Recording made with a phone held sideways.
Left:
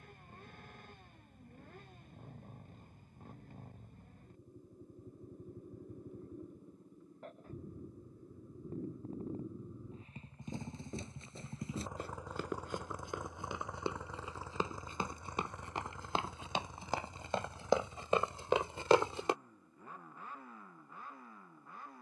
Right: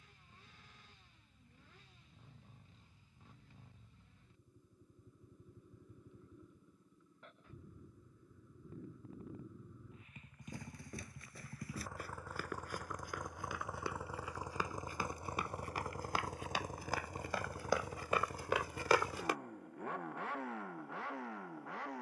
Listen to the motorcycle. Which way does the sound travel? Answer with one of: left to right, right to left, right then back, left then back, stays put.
left to right.